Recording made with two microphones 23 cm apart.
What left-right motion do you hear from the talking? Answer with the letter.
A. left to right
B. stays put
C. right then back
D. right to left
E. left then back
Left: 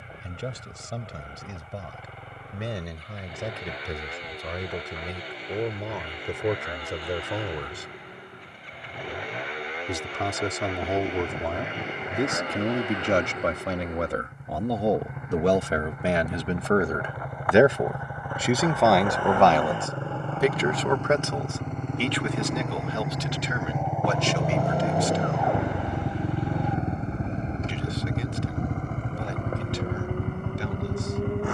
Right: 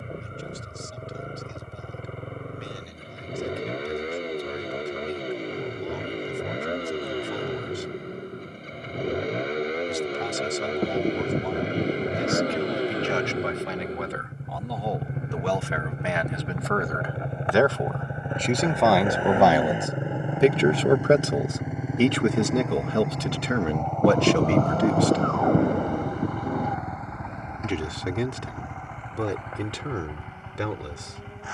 A.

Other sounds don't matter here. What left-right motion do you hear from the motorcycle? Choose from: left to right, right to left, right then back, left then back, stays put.
right to left.